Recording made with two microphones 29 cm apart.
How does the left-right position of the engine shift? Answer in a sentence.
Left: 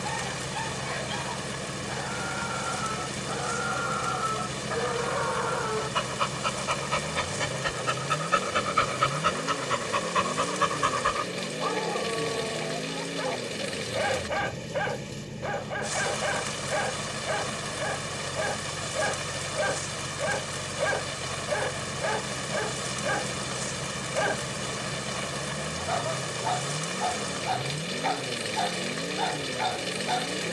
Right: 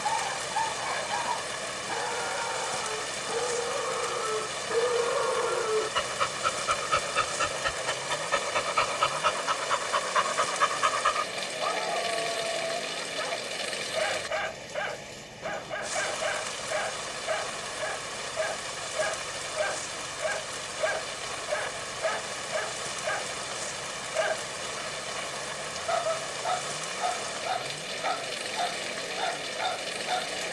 You can hear the engine stay put.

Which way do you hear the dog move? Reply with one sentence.
In this clip you hear the dog move from right to left.